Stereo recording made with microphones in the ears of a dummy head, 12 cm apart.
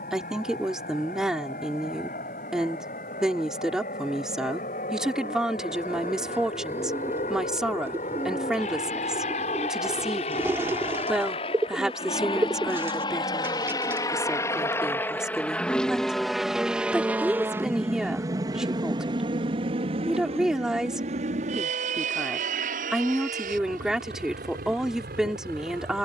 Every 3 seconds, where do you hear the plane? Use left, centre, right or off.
left, left, left, left, left, centre, right, right, right.